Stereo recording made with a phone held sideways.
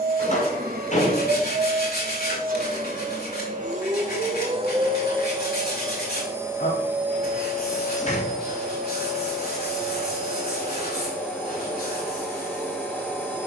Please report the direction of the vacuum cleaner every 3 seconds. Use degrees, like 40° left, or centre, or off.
70° right, 40° right, 10° right, 10° left, 10° left.